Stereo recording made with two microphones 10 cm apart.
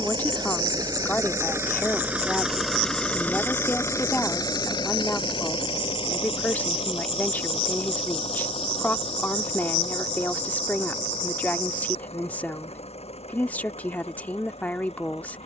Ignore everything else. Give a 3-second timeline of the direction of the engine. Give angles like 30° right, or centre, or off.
20° right, 40° left, 70° left, 80° left, 80° left.